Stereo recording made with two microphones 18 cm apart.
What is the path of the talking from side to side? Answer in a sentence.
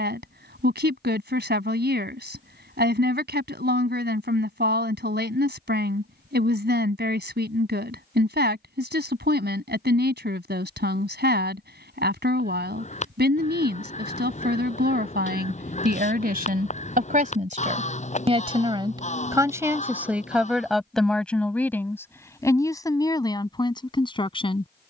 You can hear the talking travel towards the left.